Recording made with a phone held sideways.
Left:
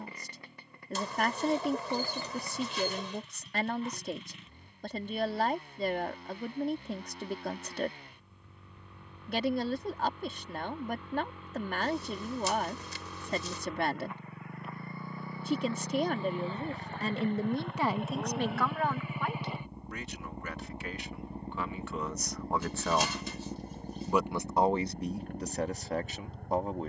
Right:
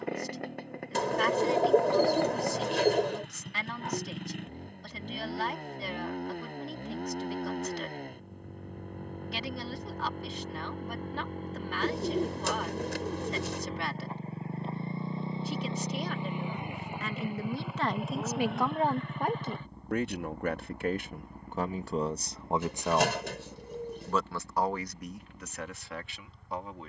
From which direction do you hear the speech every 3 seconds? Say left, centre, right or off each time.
left, left, left, left, left, left, right, right, left.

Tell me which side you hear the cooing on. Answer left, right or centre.
right.